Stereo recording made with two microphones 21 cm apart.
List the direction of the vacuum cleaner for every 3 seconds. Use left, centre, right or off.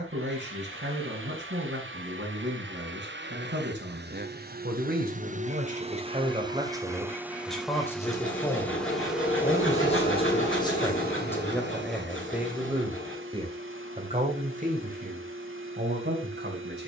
right, right, centre, right, right, right.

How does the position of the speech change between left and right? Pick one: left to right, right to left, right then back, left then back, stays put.
left then back.